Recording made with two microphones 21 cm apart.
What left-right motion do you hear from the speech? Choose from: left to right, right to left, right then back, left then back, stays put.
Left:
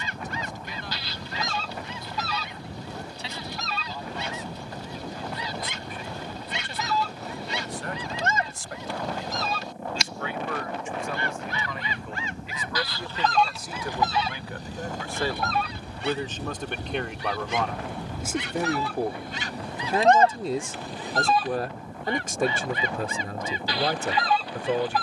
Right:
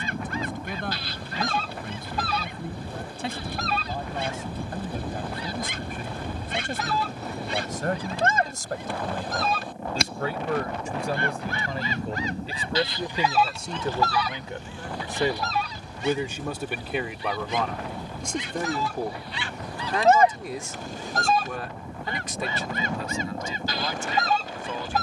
right to left.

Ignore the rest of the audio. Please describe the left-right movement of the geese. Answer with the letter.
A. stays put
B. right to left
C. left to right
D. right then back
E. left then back
E.